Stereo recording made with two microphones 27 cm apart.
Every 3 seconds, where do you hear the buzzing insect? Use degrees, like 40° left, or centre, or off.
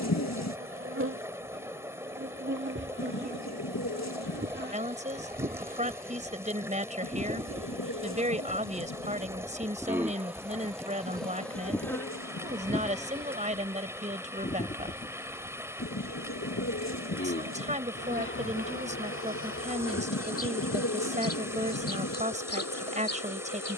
50° right, 40° right, 20° right, centre, 20° left, 40° left, 50° left, 60° left.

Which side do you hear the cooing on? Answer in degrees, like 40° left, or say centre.
70° left.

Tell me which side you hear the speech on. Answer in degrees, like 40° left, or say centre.
30° right.